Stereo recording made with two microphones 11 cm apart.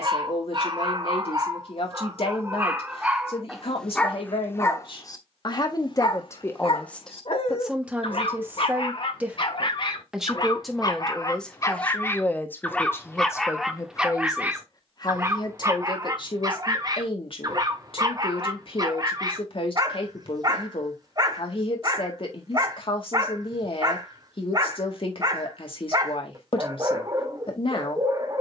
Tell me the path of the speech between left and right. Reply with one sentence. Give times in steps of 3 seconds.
In this clip you hear the speech on the left from 0 s, in the centre from 6 s and on the left from 12 s.